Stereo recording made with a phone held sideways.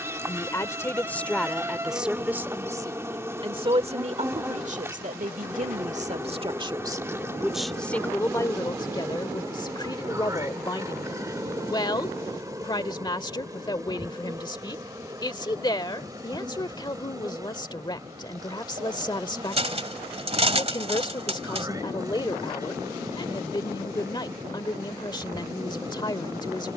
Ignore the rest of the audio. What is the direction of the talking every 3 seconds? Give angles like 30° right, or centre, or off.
centre, 40° right, centre, 30° left, 30° left, 30° left, 30° left, 30° left, 30° left.